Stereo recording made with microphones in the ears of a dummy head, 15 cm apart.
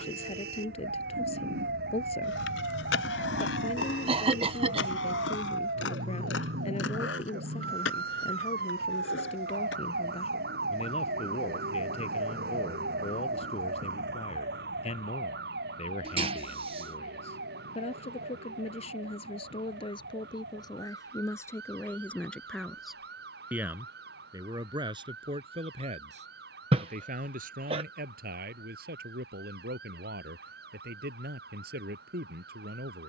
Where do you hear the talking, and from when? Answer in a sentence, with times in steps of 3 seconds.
You can hear the talking on the left from 0 s, in the centre from 21 s and on the right from 24 s.